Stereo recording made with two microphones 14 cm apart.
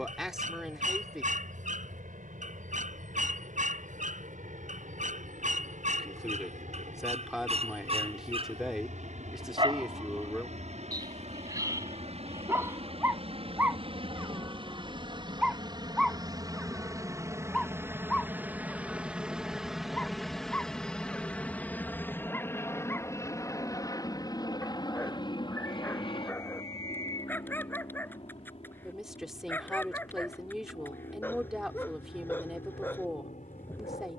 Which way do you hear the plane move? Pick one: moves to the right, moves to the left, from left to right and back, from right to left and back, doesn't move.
moves to the left.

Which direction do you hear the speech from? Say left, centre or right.
centre.